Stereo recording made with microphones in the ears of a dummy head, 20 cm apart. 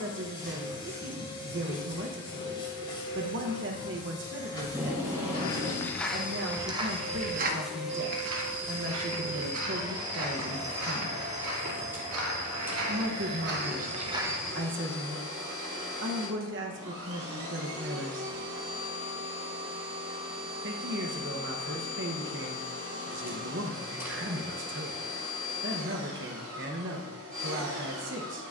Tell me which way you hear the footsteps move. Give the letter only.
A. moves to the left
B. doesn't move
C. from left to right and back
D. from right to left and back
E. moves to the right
C.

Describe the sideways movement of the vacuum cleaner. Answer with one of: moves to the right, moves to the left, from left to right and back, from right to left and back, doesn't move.
moves to the right.